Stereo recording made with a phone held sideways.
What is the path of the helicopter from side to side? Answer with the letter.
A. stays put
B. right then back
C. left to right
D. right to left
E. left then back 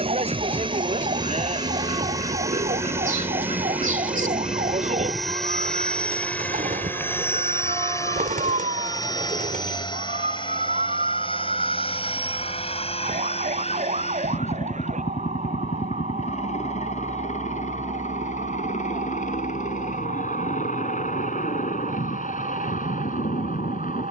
D.